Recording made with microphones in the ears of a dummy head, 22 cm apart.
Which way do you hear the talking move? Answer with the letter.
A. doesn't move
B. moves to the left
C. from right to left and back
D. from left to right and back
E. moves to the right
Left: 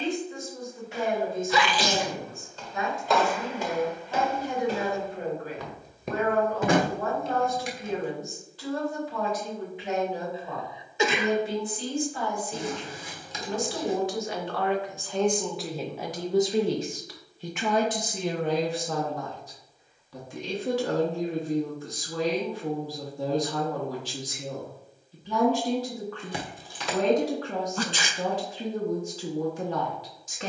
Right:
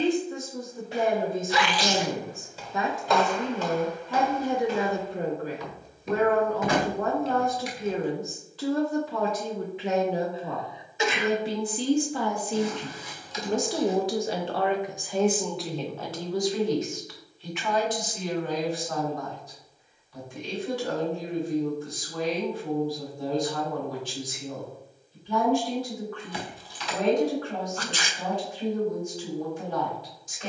B.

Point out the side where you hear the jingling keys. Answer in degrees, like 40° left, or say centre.
40° left.